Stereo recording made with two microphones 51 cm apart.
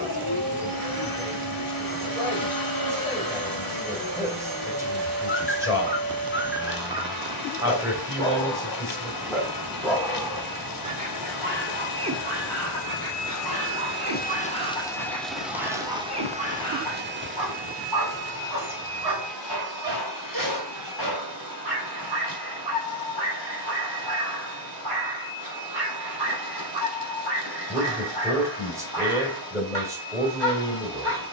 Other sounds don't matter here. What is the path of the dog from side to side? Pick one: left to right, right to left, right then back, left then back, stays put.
left to right.